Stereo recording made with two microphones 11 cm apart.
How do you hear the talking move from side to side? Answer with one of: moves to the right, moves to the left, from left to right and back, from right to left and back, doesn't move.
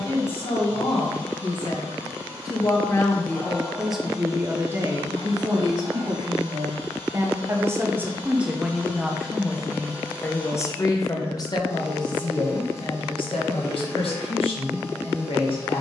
from left to right and back.